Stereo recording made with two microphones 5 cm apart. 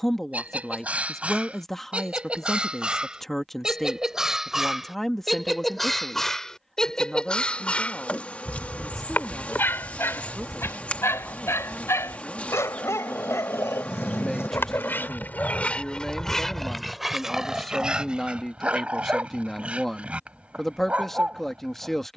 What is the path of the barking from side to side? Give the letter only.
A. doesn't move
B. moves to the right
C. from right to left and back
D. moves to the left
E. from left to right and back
C.